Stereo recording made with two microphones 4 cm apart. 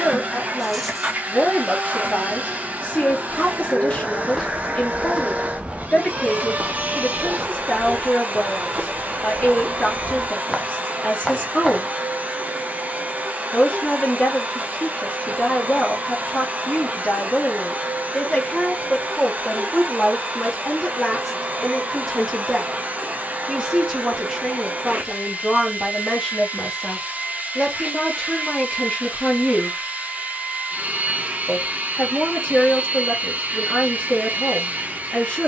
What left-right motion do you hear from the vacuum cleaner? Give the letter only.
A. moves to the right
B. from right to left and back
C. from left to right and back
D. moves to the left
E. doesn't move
E.